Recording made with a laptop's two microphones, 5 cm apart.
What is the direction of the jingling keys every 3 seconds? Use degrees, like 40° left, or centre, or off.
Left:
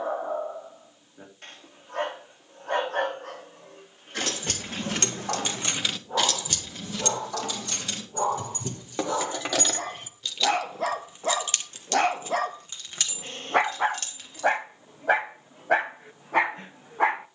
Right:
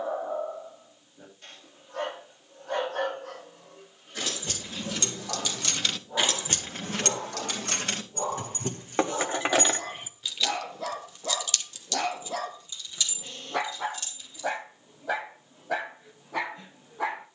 off, 50° left, 50° right, 10° right, 60° left, off.